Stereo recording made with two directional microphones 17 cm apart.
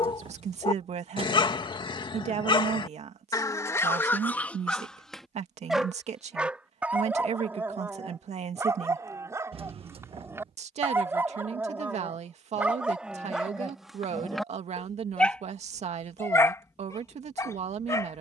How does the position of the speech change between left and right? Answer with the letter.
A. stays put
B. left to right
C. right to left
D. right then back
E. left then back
A.